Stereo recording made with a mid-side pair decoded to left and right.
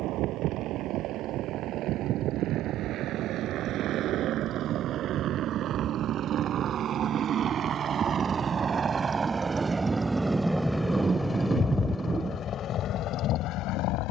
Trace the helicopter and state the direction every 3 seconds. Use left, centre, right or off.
right, right, right, centre, left.